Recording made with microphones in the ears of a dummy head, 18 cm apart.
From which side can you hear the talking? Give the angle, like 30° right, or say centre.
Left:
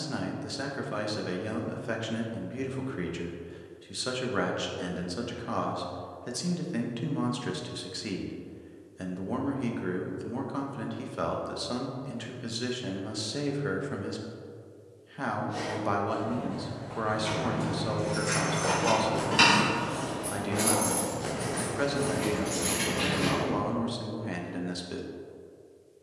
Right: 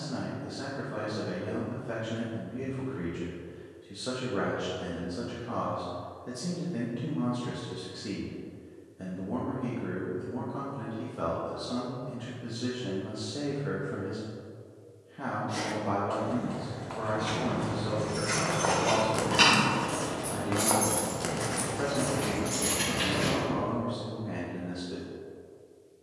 70° left.